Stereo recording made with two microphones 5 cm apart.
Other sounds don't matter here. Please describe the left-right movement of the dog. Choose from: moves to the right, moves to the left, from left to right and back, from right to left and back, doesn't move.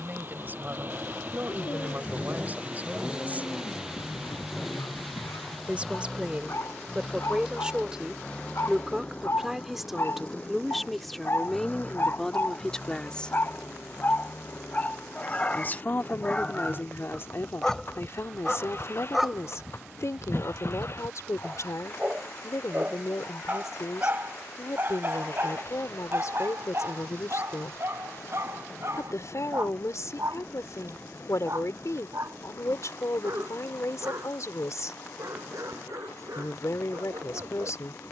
moves to the right.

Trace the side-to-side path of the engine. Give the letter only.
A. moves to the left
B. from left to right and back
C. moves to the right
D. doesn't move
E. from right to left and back
A.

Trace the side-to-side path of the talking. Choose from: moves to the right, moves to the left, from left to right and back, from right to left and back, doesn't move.
moves to the left.